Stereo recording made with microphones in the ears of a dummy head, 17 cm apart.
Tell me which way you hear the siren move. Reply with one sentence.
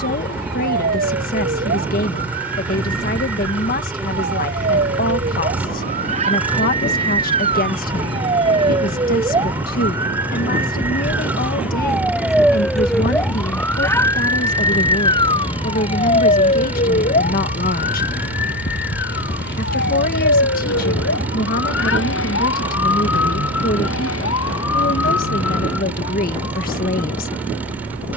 In this clip you hear the siren go from the right side to the left.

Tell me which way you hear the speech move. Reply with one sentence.
You can hear the speech stay in one place.